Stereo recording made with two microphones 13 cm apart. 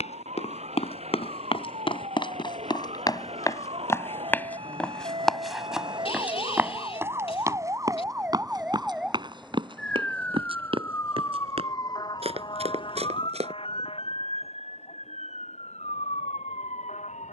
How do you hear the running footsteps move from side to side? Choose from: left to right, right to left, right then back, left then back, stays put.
left to right.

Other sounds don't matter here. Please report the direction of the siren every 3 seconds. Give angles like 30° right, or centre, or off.
60° right, 50° right, 20° right, 10° left, 40° left, 60° left.